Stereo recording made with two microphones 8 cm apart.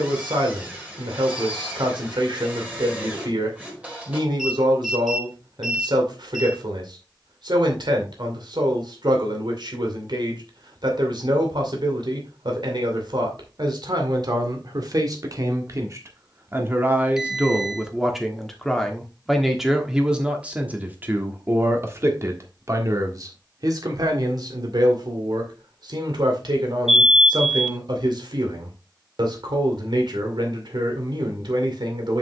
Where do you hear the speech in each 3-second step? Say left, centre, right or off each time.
right, right, right, right, right, right, centre, right, right, right, right.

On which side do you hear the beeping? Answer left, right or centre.
centre.